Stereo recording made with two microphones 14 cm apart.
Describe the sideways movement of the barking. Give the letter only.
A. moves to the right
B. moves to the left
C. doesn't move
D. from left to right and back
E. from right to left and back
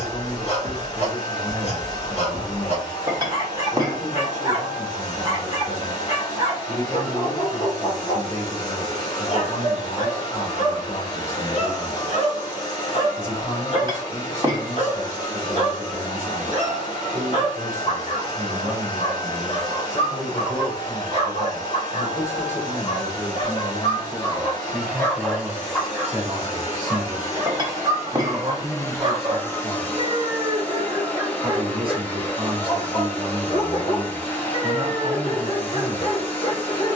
D.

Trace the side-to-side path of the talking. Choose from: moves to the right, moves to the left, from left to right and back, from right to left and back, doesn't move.
moves to the right.